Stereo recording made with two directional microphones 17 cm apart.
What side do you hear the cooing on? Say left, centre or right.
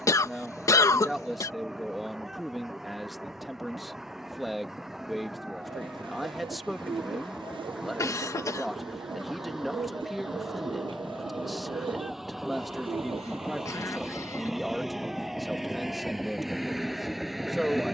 right.